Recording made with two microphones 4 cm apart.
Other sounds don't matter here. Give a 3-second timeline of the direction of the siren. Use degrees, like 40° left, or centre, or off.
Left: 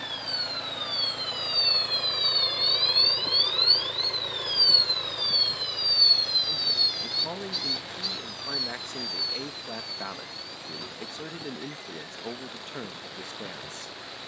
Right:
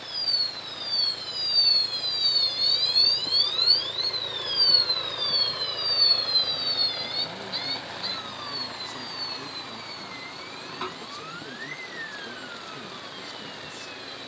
30° left, centre, 30° right, 40° right, 50° right.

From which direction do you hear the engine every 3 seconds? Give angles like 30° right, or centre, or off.
50° left, centre, 40° right, 50° right, 60° right.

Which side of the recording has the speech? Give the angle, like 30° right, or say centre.
50° left.